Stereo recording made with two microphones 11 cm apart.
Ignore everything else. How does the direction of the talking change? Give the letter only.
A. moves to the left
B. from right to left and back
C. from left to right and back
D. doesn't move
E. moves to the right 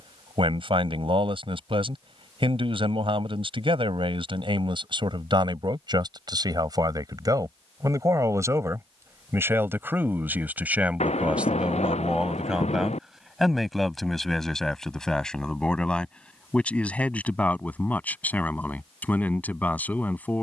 A.